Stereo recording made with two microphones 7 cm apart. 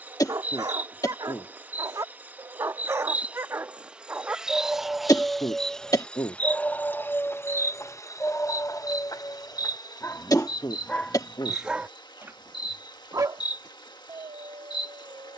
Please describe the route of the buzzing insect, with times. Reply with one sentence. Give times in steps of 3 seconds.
In this clip you hear the buzzing insect on the right from 0 s, in the centre from 3 s and on the left from 6 s.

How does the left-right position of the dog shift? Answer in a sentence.
You can hear the dog go left and come back.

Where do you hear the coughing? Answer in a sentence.
You can hear the coughing on the left.